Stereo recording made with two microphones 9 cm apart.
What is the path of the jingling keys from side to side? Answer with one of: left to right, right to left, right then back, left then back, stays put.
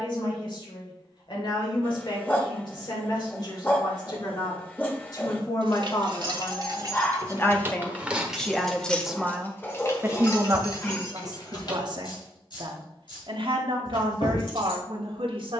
right to left.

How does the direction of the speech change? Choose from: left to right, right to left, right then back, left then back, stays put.
left to right.